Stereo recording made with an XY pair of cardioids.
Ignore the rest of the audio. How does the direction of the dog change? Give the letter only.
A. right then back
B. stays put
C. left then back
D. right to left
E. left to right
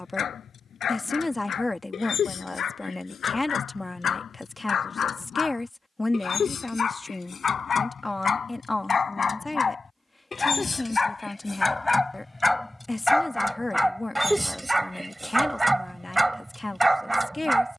E.